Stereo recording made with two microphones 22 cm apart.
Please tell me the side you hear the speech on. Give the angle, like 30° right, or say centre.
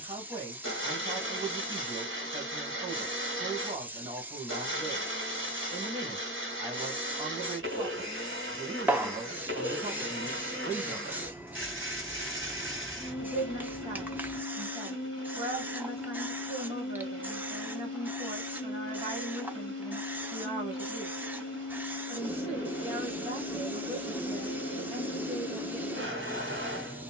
30° right.